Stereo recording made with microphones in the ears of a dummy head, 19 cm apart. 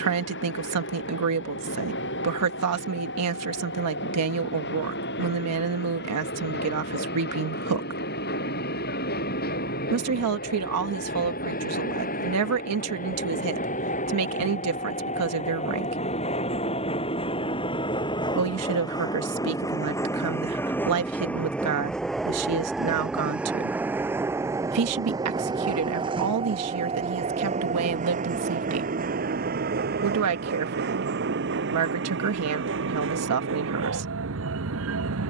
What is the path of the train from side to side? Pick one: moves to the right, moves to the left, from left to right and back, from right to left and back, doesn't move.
moves to the right.